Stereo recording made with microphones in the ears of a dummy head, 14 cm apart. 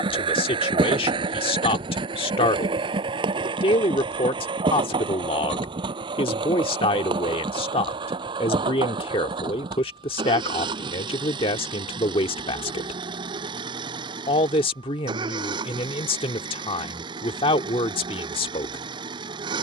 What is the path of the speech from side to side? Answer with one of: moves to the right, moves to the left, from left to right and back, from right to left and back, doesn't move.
doesn't move.